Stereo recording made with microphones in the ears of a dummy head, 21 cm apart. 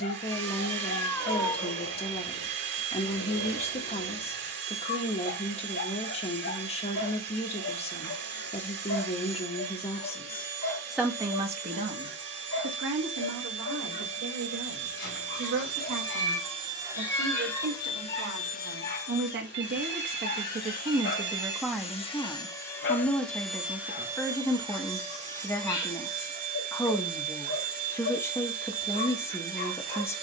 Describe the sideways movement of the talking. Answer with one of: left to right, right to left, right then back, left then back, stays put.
right then back.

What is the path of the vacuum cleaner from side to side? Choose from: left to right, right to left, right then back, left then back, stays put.
left then back.